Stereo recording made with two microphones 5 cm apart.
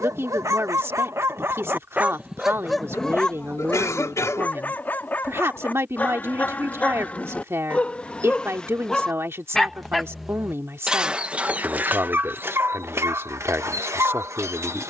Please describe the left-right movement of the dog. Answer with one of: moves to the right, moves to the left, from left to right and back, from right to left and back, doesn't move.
from right to left and back.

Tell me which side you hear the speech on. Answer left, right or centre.
right.